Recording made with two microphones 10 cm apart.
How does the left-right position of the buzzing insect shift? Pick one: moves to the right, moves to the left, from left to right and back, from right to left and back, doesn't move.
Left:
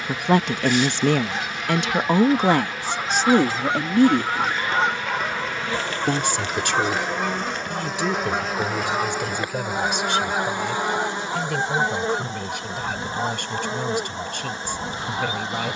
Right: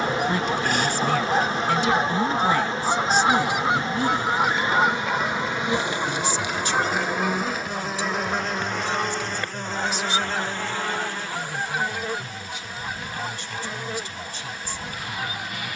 moves to the left.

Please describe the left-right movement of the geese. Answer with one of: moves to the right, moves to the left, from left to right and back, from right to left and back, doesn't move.
moves to the left.